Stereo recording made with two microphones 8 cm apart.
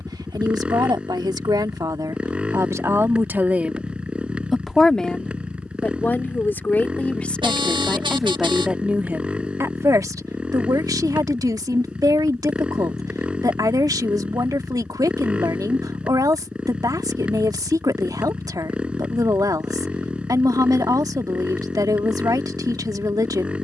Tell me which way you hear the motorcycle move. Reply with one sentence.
In this clip you hear the motorcycle stay put.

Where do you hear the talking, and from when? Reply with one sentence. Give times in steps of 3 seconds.
You can hear the talking on the right from 0 s, in the centre from 3 s and on the right from 9 s.